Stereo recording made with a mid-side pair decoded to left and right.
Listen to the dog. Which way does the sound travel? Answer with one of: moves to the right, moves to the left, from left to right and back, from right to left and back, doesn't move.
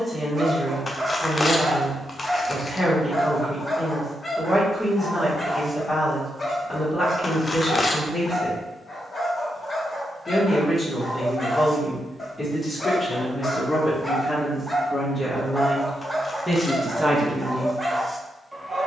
from right to left and back.